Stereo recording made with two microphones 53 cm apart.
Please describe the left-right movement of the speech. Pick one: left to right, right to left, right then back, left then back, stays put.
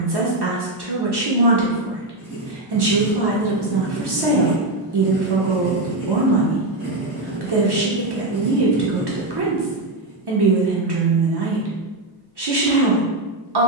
stays put.